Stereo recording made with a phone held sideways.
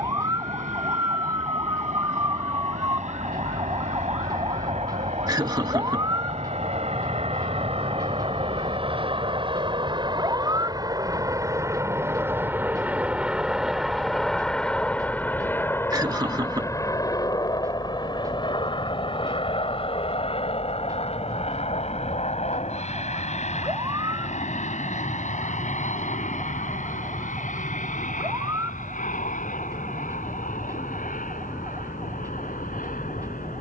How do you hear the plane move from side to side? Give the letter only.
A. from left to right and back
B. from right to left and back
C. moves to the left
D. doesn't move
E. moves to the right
C.